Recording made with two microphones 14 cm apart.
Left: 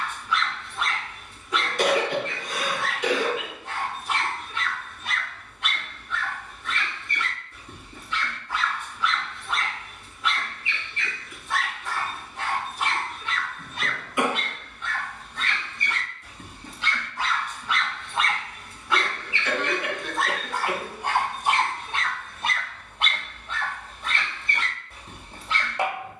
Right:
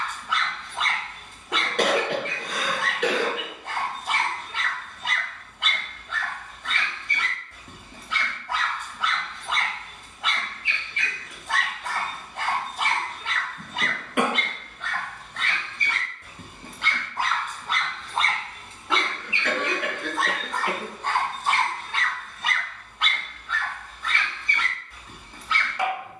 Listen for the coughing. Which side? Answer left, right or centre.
right.